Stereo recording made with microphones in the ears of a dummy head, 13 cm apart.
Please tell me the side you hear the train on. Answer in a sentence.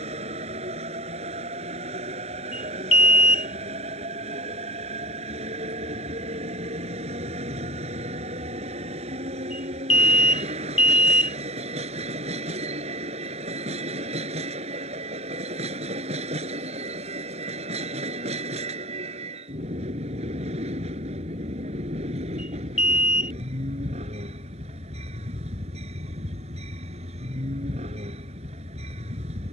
In this clip you hear the train on the right.